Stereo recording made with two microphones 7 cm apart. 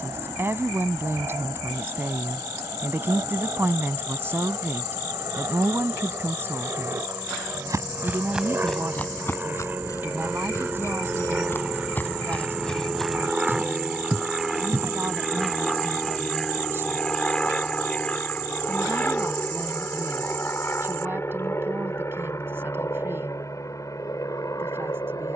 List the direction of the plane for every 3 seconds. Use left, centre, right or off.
right, right, right, right, centre, centre, left, left, left.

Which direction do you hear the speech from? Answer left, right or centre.
right.